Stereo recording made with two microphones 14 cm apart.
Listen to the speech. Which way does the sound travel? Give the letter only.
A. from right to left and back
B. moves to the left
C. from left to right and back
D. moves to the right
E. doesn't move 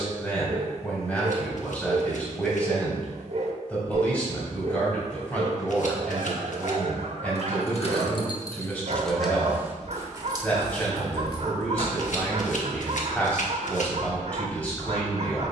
E.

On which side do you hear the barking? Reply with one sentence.
In this clip you hear the barking on the right.